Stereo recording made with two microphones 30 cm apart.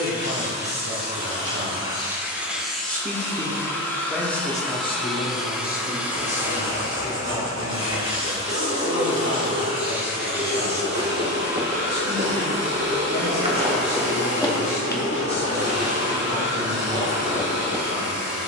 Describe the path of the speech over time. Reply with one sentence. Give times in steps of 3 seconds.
You can hear the speech on the right from 0 s, in the centre from 3 s and on the left from 6 s.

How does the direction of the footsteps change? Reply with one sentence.
In this clip you hear the footsteps travel towards the left.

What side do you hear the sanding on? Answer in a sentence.
In this clip you hear the sanding on the right.